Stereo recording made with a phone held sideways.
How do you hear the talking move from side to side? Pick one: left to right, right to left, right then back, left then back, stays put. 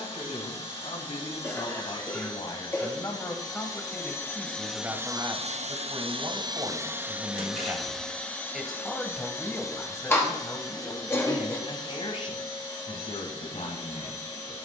right then back.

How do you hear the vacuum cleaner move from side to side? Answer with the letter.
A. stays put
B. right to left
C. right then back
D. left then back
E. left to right
C.